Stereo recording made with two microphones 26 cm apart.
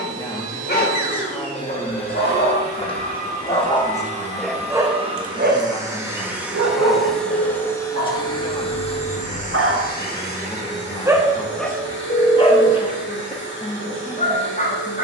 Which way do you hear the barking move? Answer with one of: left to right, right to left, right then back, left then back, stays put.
right then back.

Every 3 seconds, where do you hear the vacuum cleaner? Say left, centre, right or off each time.
right, right, centre, left, left.